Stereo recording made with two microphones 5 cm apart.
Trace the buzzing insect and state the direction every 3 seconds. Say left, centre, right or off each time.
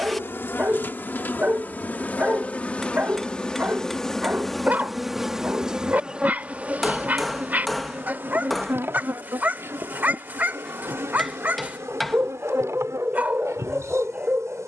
left, centre, right, right, right.